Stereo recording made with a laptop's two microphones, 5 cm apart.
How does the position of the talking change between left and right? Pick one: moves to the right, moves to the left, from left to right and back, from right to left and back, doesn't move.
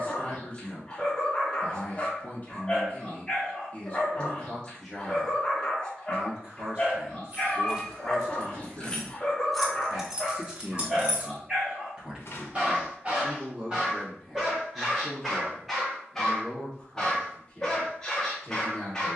from left to right and back.